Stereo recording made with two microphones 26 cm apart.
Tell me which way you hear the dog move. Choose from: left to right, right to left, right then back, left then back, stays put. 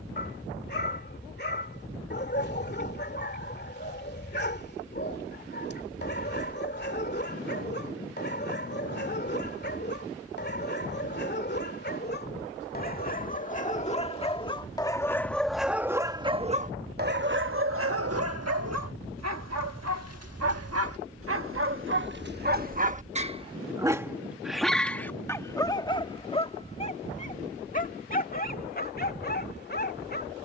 right then back.